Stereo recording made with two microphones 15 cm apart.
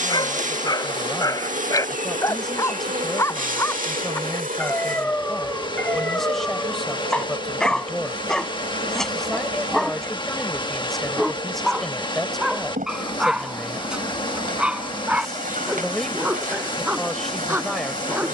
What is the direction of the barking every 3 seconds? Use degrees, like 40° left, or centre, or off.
30° left, 10° left, 10° left, centre, centre, 10° right.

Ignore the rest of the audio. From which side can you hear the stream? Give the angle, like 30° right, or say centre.
30° left.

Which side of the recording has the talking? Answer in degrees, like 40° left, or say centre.
centre.